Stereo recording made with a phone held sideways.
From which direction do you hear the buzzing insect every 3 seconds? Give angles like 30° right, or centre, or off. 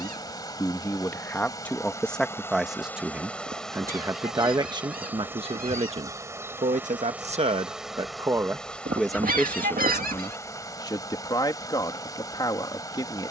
20° left, 10° right, 10° right, 20° left, 20° left.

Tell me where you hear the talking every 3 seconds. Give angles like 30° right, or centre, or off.
10° left, 20° right, 40° right, 20° left, 30° left.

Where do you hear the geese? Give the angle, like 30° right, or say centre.
60° right.